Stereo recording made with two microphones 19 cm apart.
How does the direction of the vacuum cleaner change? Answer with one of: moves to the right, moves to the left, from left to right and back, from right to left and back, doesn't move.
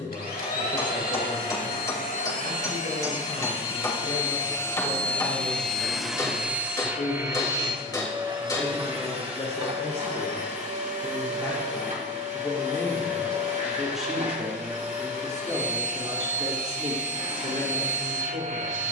moves to the right.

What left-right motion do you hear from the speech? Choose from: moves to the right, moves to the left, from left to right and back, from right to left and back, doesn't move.
moves to the right.